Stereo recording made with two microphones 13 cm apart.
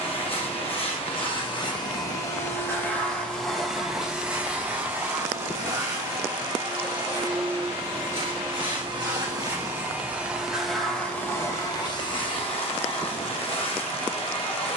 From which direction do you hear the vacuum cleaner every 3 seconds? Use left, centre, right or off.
left, centre, right, centre, left.